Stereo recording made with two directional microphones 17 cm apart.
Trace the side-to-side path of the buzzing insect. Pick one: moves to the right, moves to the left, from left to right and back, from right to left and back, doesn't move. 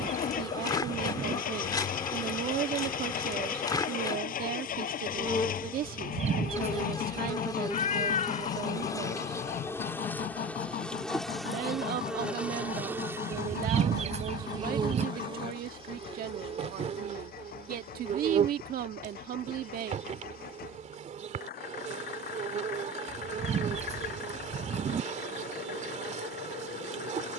moves to the right.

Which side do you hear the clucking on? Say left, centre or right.
right.